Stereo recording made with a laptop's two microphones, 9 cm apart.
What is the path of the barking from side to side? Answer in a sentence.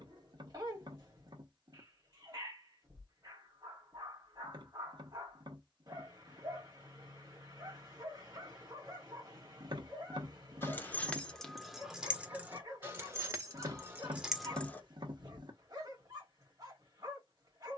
You can hear the barking stay in one place.